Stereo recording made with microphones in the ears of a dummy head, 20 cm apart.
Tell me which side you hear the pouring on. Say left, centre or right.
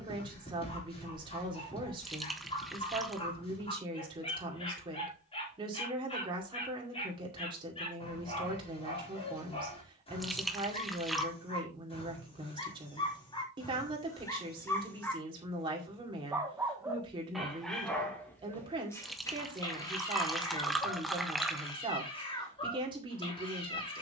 centre.